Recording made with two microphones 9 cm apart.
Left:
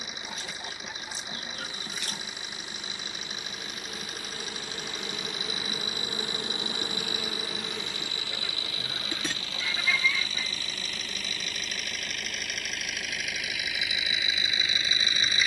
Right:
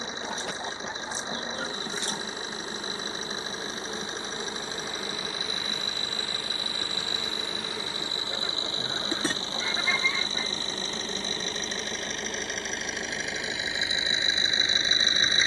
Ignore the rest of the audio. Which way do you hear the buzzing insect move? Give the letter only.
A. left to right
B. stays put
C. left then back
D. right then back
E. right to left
C.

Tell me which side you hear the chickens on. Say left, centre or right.
right.